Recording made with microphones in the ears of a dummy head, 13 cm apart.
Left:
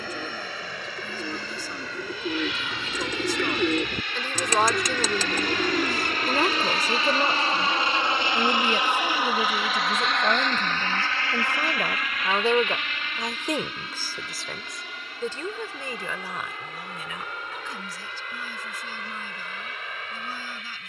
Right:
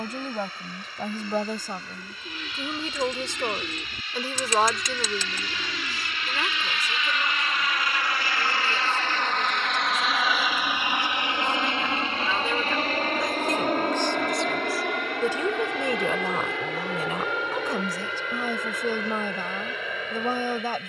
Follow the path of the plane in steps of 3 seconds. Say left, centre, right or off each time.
left, left, left, centre, right, right, right.